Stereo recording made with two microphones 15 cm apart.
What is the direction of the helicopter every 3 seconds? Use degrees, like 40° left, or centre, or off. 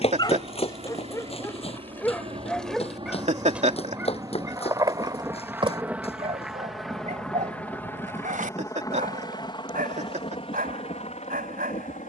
40° right, 20° right, 10° left, 40° left.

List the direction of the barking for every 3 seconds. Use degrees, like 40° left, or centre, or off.
20° left, 20° right, 50° right, 70° right.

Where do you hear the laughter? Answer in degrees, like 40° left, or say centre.
50° right.